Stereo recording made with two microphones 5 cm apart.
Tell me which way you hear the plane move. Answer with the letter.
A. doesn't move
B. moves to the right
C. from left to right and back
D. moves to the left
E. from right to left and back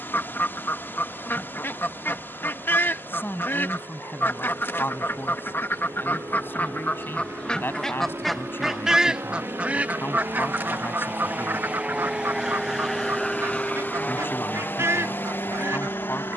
D.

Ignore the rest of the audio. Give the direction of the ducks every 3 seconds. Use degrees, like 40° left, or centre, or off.
50° left, 50° left, 20° left, 40° right, 60° right, 70° right.